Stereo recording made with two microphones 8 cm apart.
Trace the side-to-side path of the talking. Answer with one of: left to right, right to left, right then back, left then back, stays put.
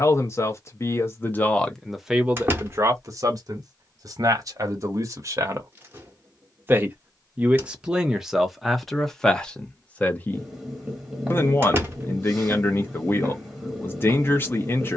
right then back.